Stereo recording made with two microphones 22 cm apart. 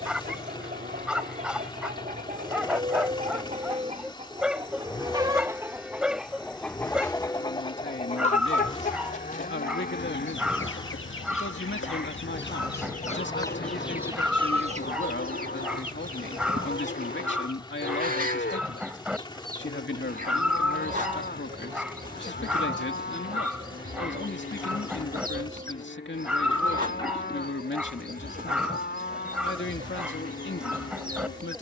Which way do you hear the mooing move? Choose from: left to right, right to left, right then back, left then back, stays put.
right to left.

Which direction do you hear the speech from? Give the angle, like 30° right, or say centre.
60° left.